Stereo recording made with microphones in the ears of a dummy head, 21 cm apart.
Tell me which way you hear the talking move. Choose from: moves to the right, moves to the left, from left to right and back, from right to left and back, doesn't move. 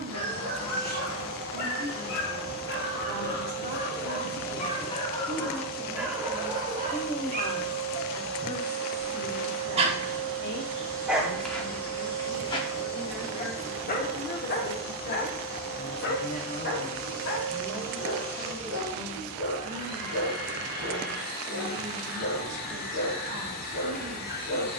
from right to left and back.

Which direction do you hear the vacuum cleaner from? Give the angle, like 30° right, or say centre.
40° left.